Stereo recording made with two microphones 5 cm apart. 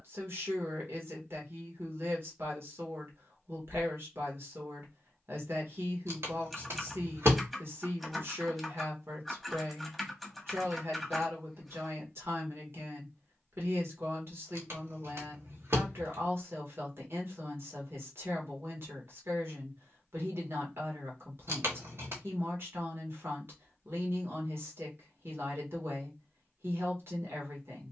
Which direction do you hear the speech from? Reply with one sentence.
You can hear the speech on the right.